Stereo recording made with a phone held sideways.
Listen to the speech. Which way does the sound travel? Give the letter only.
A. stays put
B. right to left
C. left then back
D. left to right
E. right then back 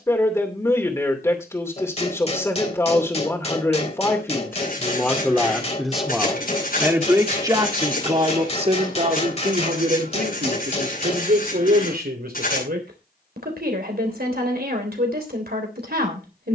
D.